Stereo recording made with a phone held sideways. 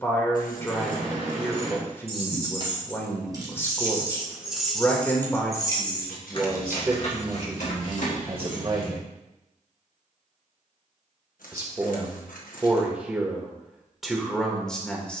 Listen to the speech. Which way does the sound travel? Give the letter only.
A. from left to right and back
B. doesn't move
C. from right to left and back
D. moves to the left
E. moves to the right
A.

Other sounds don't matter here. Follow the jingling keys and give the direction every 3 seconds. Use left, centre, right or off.
right, centre, left, off, off.